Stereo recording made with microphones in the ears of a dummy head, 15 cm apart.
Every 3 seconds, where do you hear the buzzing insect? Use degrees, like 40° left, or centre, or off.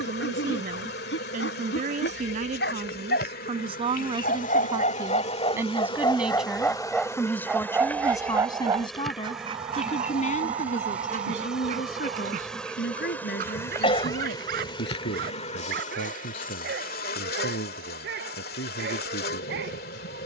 70° left, 50° left, 20° left, centre, 20° left, 50° left, 60° left.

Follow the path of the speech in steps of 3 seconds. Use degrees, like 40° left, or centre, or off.
50° right, 30° right, 10° left, 50° left, 60° left, 70° left, 80° left.